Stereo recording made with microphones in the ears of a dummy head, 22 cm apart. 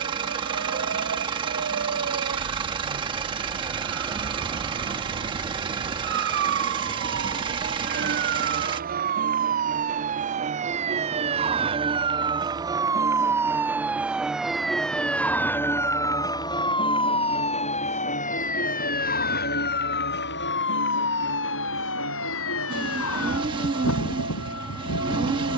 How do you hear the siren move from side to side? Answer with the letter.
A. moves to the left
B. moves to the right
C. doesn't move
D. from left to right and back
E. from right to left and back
A.